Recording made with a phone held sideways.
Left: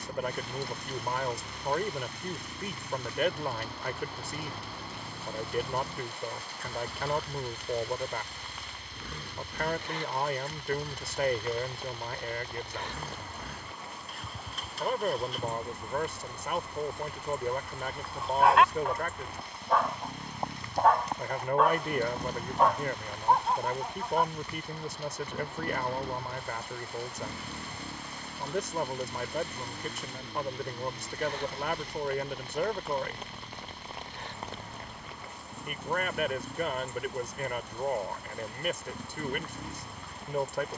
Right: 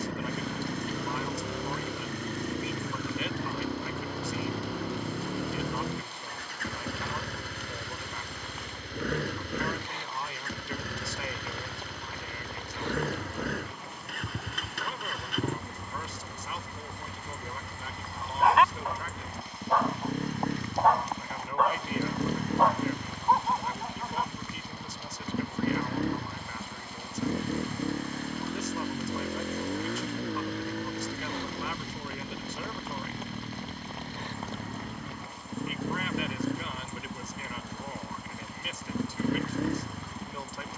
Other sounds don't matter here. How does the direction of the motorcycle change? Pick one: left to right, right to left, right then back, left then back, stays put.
stays put.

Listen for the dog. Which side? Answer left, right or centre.
centre.